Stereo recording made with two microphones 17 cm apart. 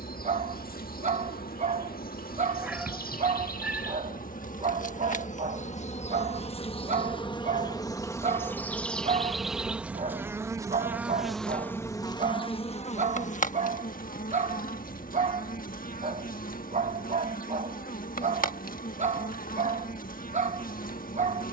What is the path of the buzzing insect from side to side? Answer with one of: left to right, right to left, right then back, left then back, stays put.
right then back.